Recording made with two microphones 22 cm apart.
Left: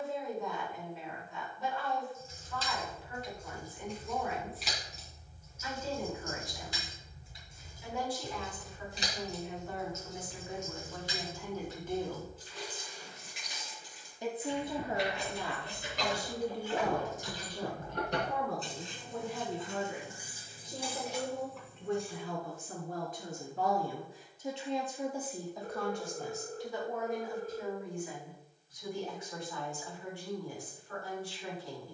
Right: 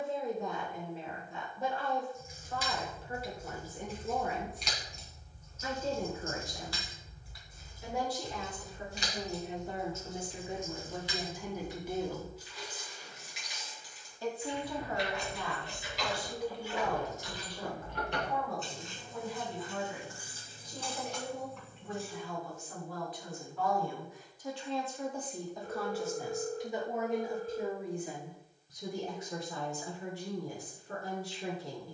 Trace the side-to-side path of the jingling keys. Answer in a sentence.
You can hear the jingling keys go left and come back.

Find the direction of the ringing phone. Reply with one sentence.
In this clip you hear the ringing phone on the left.